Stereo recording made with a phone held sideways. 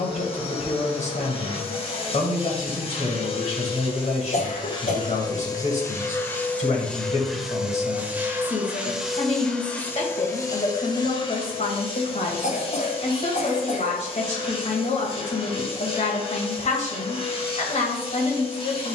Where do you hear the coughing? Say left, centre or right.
left.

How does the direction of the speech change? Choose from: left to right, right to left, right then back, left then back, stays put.
stays put.